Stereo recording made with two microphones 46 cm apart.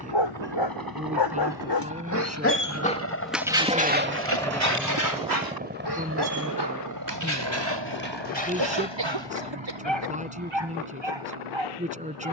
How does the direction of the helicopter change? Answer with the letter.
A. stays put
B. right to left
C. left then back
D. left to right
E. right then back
D.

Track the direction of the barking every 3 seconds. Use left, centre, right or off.
left, right, right, right.